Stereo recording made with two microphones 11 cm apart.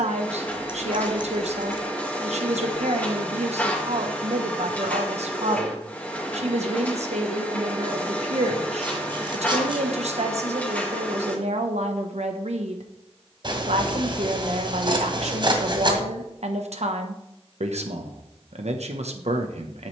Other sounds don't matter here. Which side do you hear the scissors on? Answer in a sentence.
You can hear the scissors on the right.